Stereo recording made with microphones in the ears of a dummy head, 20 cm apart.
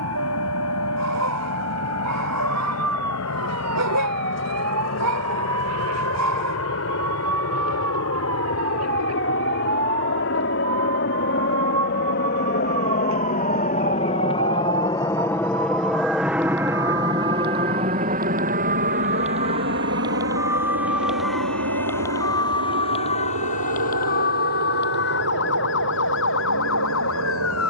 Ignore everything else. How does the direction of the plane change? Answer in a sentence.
You can hear the plane travel towards the right.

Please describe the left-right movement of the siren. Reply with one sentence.
In this clip you hear the siren move to the left.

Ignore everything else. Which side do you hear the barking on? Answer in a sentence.
In this clip you hear the barking on the right.